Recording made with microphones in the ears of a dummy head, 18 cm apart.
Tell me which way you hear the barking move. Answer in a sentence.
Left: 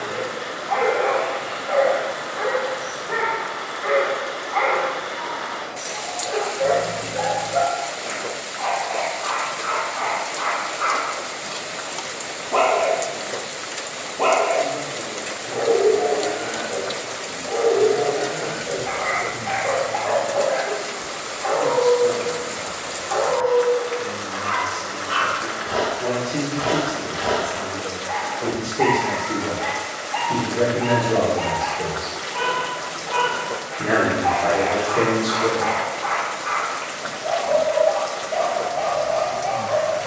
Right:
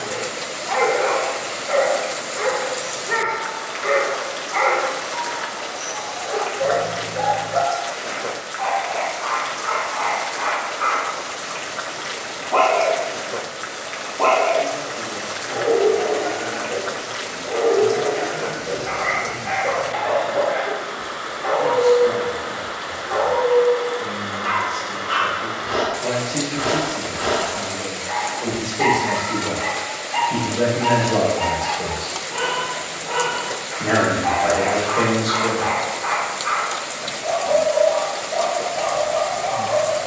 You can hear the barking go left and come back.